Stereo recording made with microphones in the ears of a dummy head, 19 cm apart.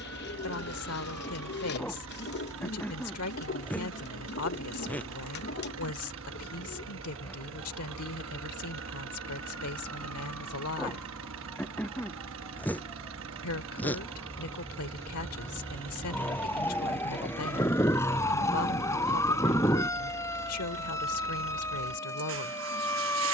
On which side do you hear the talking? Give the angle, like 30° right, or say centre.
80° left.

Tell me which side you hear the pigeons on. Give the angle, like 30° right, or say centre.
50° left.